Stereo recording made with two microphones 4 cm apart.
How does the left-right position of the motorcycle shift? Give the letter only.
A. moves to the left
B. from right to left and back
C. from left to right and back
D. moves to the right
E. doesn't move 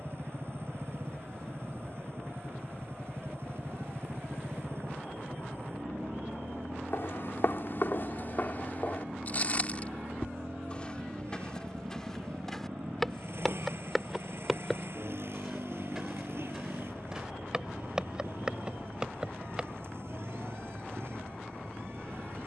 E.